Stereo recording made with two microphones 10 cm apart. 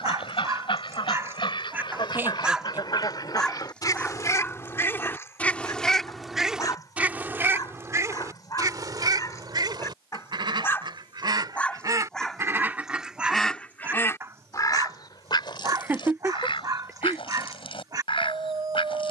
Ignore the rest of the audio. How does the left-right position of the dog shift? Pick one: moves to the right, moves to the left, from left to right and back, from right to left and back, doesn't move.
from right to left and back.